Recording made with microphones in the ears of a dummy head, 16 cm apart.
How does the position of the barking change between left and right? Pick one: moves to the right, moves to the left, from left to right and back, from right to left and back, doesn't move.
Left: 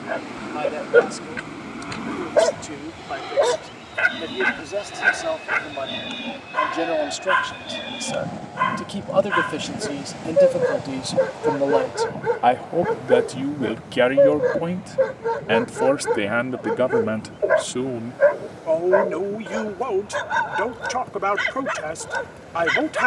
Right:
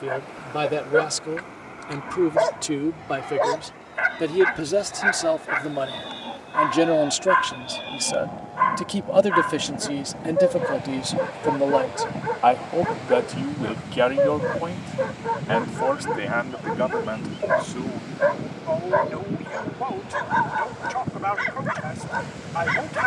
doesn't move.